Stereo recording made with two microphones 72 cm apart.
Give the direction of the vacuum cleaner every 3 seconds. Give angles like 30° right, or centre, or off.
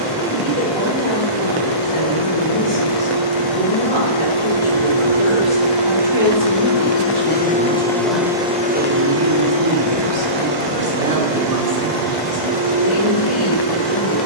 60° left, 40° left, 10° left, 40° right, 70° right.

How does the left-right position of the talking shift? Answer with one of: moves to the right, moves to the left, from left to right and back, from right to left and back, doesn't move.
from left to right and back.